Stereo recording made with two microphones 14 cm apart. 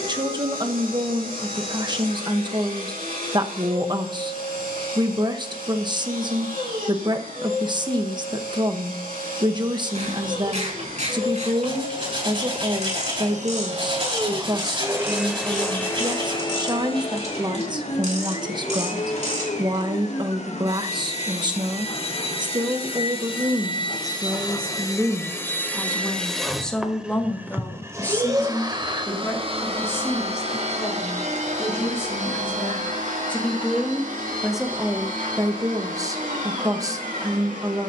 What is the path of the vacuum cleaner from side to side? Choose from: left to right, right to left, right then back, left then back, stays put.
left then back.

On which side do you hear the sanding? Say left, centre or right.
right.